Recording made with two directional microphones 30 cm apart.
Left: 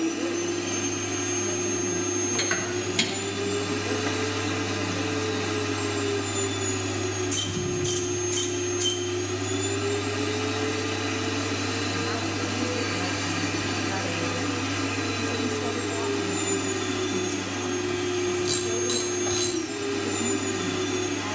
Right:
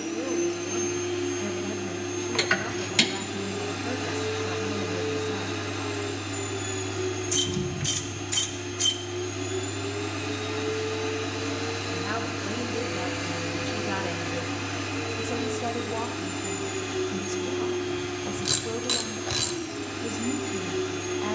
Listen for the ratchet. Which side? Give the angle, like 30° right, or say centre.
20° right.